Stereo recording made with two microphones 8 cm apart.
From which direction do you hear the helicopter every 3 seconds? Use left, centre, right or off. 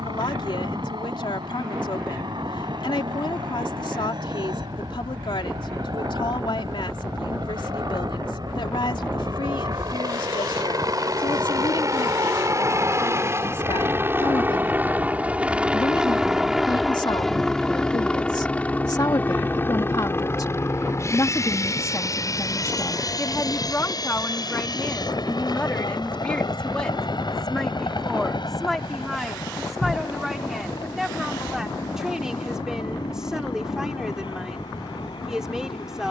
right, right, right, right, right, centre, left, left, left, left, left, left.